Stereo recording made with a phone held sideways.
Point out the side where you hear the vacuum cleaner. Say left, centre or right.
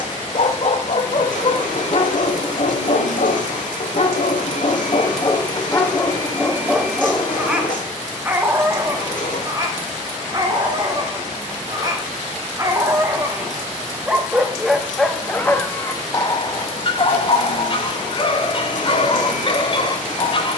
left.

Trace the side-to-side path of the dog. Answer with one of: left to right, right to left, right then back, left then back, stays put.
right then back.